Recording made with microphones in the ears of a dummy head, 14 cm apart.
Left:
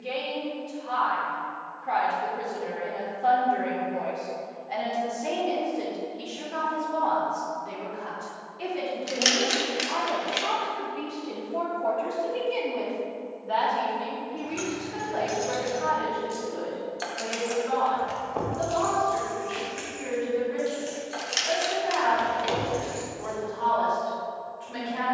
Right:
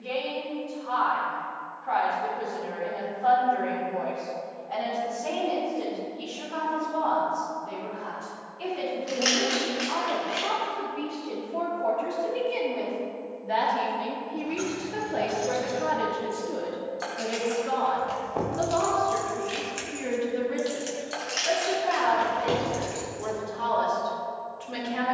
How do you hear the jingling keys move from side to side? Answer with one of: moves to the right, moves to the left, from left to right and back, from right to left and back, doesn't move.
moves to the right.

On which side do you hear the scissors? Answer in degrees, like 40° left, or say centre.
40° left.